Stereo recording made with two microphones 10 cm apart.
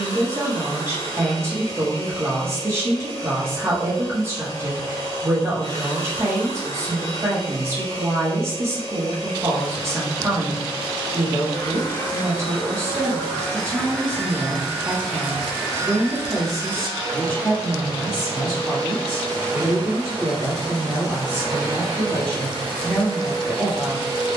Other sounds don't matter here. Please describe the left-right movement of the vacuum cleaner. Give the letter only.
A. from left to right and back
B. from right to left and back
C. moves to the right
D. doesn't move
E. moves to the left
C.